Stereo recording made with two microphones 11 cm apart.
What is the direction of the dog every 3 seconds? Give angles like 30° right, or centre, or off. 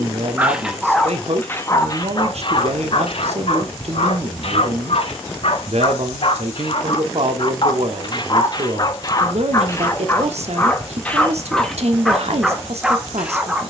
20° left, 60° left, 50° left, 20° left, 10° right.